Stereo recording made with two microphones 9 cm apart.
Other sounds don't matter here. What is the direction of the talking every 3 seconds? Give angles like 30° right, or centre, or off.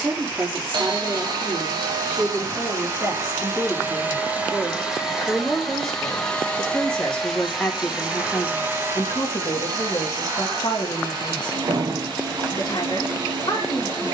20° right, 10° right, 20° left, 40° left, 50° left.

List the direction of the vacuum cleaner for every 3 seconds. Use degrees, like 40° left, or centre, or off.
40° right, 10° right, centre, 50° right, 50° right.